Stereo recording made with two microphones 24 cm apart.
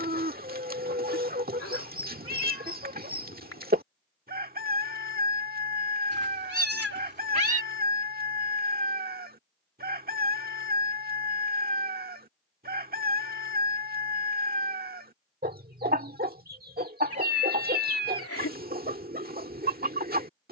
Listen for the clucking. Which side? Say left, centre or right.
right.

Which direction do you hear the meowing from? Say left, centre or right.
left.